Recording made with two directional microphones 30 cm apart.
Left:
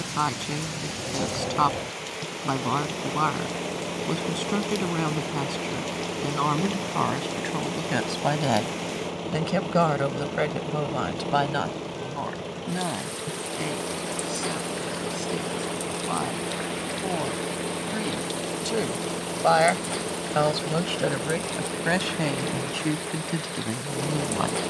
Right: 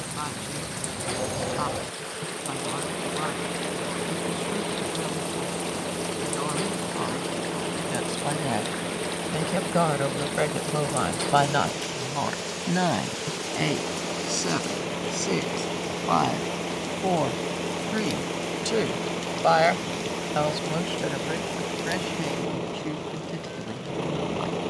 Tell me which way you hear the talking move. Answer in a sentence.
You can hear the talking go right and come back.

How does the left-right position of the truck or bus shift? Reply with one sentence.
In this clip you hear the truck or bus stay in one place.